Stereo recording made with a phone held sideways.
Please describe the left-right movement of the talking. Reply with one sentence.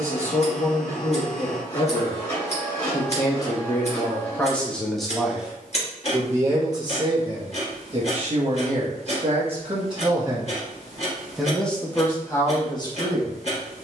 In this clip you hear the talking go right and come back.